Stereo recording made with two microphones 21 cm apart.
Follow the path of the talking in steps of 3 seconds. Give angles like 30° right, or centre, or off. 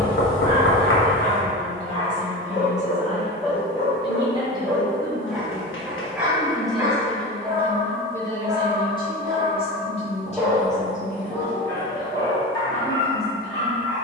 40° right, 20° right, 10° left, 30° left, 50° left.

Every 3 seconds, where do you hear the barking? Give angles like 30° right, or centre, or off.
30° left, 10° left, 20° right, centre, 20° left.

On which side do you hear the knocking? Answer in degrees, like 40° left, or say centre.
70° left.